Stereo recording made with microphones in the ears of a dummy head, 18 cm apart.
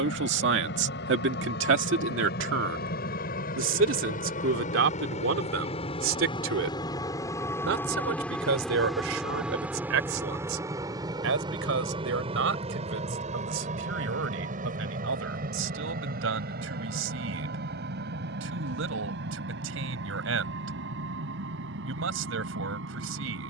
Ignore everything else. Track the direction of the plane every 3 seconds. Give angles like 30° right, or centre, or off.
60° left, 40° left, 10° left, 10° right, 30° right, 50° right, 50° right, 60° right.